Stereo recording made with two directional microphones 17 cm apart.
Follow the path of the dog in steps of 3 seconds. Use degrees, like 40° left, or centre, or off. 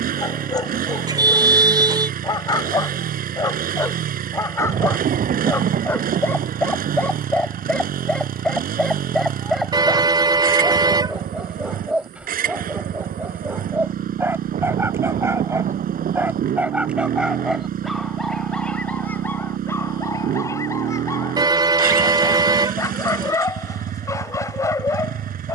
20° left, 20° left, 10° left, centre, 10° right, 10° right, 10° left, 20° left, 20° left.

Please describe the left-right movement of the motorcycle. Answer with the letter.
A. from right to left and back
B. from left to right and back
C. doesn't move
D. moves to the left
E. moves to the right
C.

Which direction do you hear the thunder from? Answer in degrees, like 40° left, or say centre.
50° right.